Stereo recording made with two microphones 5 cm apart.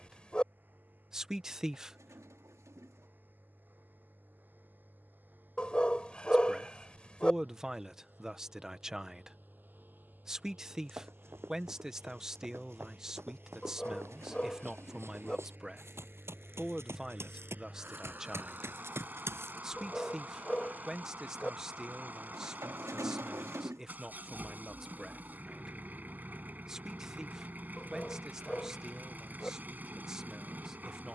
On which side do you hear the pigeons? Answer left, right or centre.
right.